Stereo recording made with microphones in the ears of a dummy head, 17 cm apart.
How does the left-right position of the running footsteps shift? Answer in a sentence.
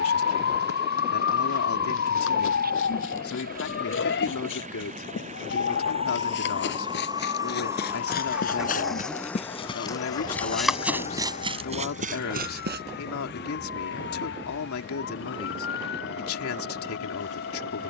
You can hear the running footsteps go from the left side to the right.